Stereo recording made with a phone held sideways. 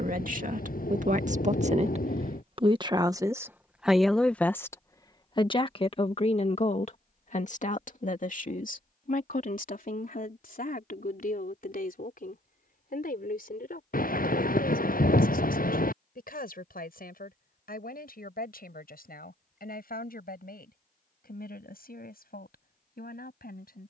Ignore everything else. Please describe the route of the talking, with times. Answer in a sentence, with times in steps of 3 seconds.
You can hear the talking on the right from 0 s, in the centre from 3 s and on the left from 6 s.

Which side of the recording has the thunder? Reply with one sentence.
In this clip you hear the thunder on the left.